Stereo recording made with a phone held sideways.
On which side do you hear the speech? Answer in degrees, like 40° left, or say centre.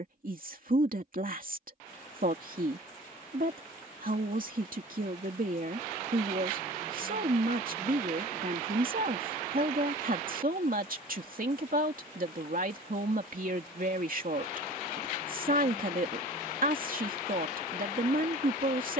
60° right.